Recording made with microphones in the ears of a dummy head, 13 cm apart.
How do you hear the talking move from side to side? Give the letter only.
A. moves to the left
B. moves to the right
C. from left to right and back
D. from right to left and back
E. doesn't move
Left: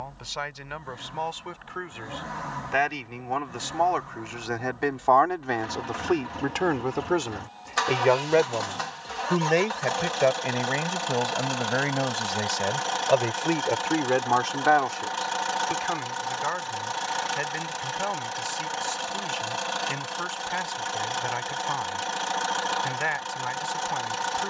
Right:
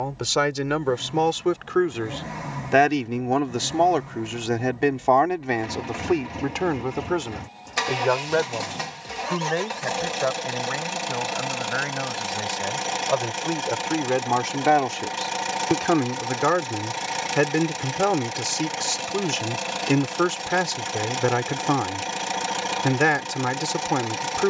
D.